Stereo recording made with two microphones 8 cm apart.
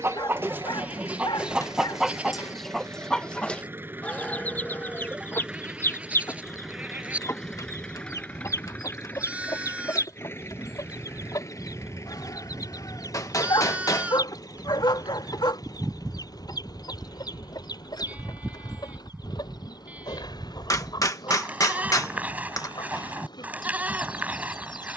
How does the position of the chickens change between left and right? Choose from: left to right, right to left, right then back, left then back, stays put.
right to left.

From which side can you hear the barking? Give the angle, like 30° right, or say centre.
70° left.